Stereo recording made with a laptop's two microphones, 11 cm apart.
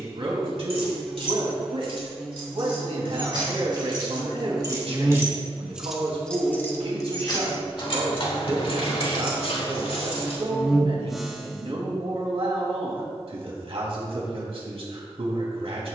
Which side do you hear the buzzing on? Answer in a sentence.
In this clip you hear the buzzing in the centre.